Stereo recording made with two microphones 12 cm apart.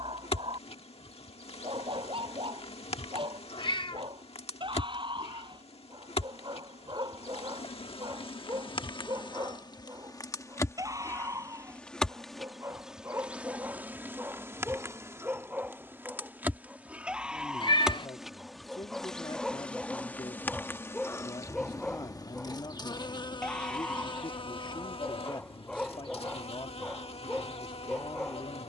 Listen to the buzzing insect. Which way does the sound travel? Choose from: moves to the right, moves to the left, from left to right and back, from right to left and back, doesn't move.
from left to right and back.